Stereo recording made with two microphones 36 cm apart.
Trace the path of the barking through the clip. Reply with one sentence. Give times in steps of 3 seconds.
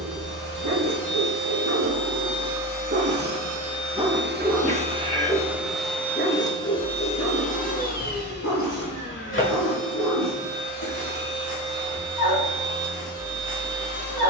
In this clip you hear the barking on the right from 0 s, in the centre from 3 s and on the left from 6 s.